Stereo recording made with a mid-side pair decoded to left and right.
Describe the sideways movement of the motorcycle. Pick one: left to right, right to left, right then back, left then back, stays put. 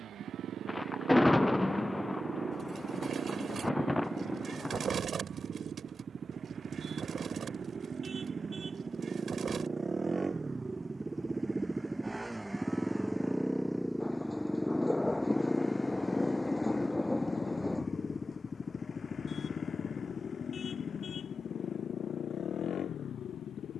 right to left.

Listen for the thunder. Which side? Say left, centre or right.
centre.